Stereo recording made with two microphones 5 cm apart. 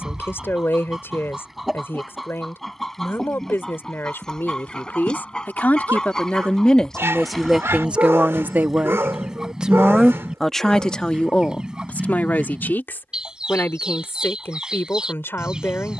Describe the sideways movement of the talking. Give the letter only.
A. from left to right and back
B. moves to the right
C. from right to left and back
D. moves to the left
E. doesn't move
A.